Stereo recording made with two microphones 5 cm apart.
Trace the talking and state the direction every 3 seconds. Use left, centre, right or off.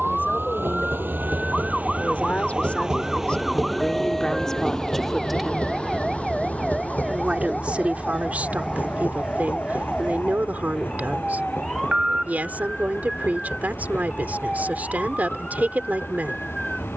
left, centre, right, right, right, right.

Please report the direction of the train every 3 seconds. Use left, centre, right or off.
right, centre, left, left, left, left.